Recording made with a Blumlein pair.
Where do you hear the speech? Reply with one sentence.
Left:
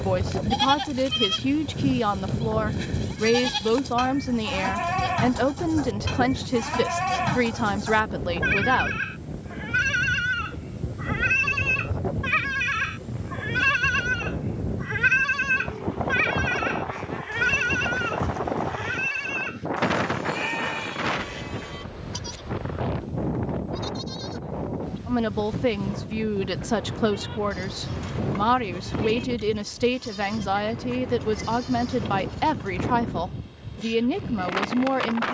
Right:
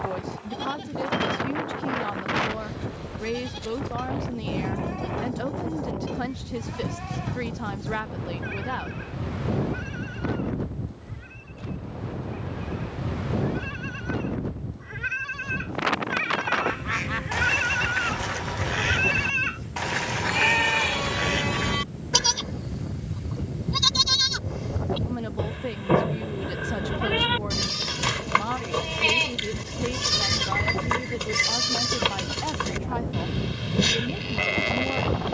In this clip you hear the speech on the left.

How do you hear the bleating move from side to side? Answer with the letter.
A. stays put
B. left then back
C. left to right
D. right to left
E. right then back
C.